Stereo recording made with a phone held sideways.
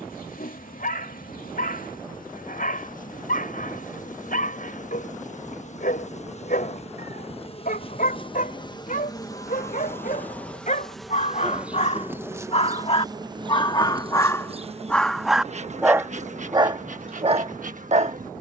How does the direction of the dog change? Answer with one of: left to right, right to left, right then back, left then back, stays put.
left to right.